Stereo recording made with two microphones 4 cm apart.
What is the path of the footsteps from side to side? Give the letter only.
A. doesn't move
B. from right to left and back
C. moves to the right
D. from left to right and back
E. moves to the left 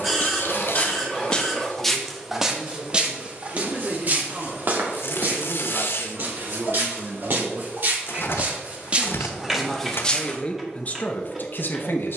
D.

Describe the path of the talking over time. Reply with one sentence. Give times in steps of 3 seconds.
You can hear the talking on the right from 0 s and on the left from 9 s.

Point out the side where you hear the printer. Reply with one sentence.
In this clip you hear the printer in the centre.